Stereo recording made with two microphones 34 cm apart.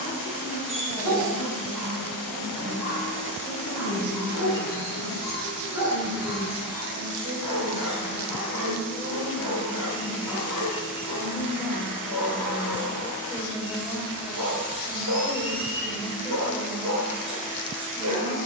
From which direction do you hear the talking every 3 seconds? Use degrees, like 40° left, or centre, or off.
60° right, 50° right, 30° right, 10° right, 10° left, 10° left.